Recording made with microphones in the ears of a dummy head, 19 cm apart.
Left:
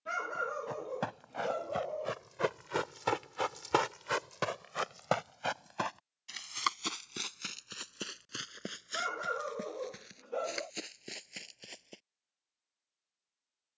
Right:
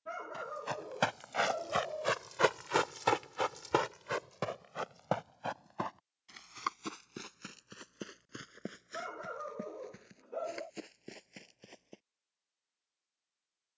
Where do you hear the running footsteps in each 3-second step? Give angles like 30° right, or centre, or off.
50° right, 40° left, 70° left, 80° left, off.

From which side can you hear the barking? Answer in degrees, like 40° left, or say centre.
80° left.